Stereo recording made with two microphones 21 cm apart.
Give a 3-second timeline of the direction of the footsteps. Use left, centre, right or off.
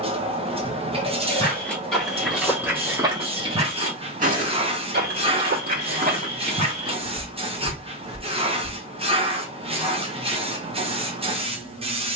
centre, right, right, off.